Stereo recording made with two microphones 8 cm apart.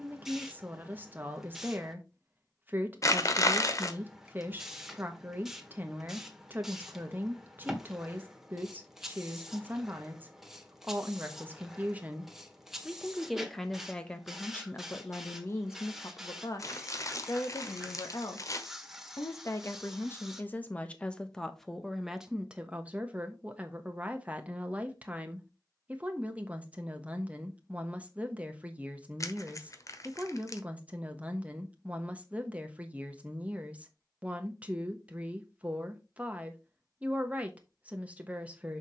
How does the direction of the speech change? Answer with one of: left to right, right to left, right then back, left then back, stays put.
left then back.